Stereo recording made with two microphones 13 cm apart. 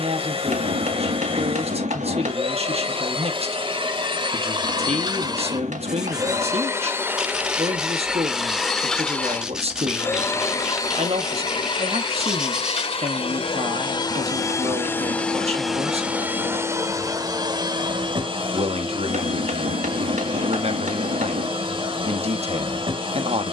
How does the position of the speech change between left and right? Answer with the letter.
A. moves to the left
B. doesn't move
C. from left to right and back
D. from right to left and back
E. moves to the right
B.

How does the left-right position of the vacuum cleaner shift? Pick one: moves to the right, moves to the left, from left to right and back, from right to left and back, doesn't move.
from right to left and back.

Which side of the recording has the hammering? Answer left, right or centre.
right.